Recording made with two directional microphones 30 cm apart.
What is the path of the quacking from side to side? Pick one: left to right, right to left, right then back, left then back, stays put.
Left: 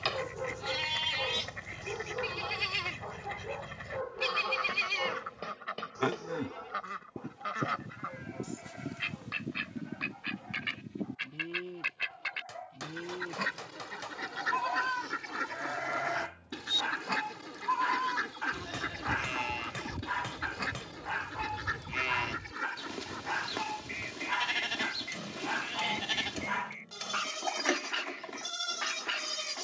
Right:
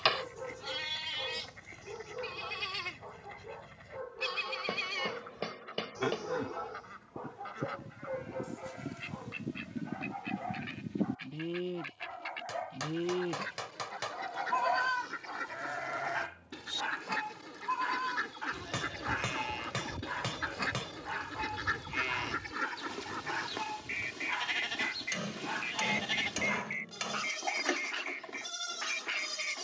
left to right.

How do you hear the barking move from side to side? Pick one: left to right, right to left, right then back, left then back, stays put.
right then back.